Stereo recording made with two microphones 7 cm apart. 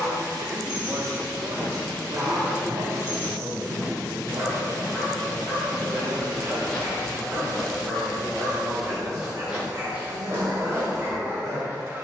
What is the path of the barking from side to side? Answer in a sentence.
You can hear the barking stay put.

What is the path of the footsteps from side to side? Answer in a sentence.
In this clip you hear the footsteps move from right to left and back again.